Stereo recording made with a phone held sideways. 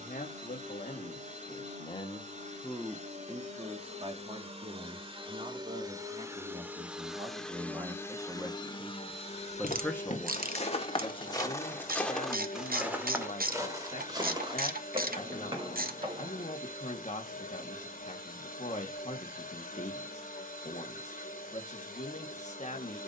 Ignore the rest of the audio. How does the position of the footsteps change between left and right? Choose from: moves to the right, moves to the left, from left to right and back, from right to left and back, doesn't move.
moves to the right.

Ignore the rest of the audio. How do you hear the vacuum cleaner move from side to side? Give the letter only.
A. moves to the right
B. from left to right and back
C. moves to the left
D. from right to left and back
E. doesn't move
C.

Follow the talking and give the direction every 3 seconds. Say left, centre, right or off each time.
left, right, right, left, left, left, left, left.